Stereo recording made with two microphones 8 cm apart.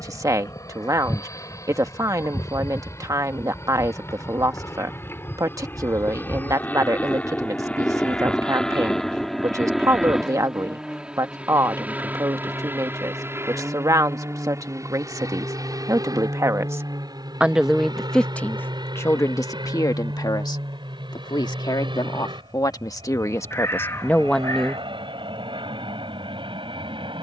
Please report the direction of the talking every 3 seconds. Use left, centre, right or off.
right, right, right, right, right, right, left, left, centre.